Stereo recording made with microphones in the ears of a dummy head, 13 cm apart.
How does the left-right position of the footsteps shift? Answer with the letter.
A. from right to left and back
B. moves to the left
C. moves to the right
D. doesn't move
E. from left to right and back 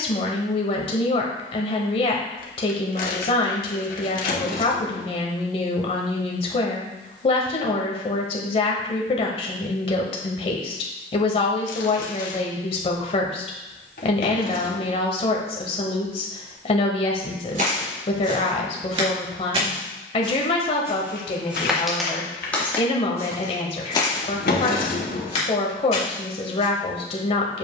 B.